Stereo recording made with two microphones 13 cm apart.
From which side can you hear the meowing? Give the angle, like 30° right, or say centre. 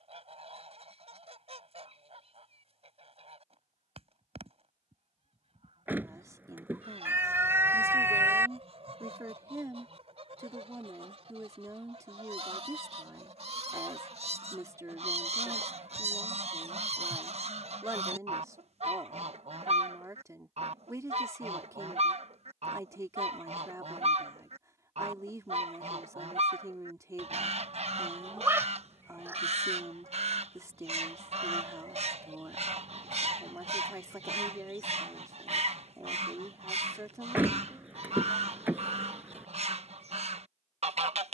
20° right.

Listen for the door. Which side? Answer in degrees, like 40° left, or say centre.
10° right.